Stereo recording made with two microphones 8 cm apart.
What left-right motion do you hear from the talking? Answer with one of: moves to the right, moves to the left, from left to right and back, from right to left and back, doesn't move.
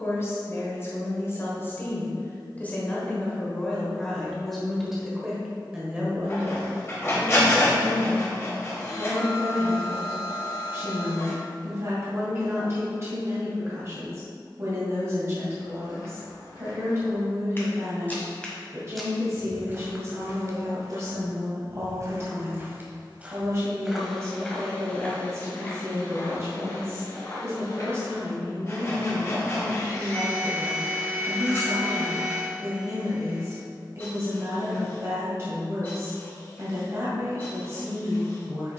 moves to the right.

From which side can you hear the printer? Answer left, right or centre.
left.